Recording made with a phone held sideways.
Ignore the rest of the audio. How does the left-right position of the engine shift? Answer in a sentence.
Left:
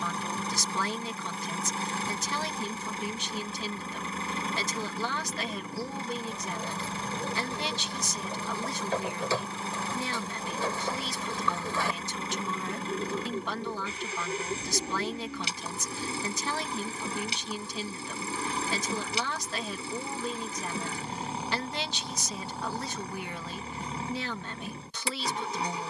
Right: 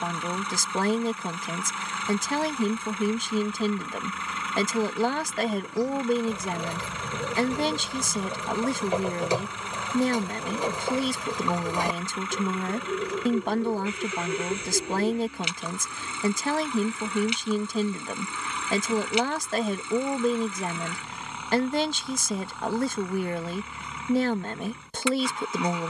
In this clip you hear the engine stay put.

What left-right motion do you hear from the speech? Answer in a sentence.
In this clip you hear the speech stay in one place.